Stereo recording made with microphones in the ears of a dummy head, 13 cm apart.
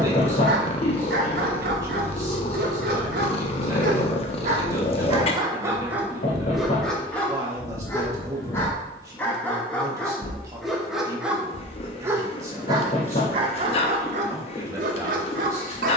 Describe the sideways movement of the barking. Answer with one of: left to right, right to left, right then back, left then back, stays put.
left then back.